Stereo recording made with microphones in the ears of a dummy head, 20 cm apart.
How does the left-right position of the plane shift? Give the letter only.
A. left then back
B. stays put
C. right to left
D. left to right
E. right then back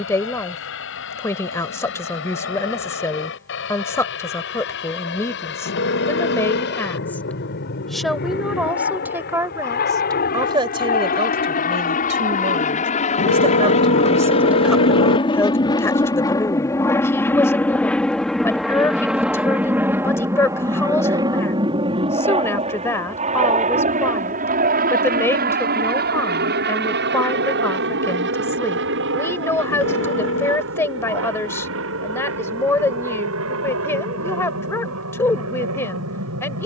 D.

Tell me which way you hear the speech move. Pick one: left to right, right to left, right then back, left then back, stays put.
right then back.